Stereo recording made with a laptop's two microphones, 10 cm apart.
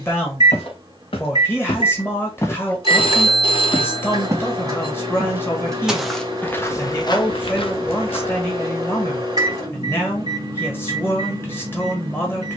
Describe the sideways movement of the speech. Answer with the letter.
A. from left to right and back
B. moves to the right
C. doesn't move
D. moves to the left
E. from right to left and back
C.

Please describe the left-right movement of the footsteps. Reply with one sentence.
You can hear the footsteps go right and come back.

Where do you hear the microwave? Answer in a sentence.
You can hear the microwave on the right.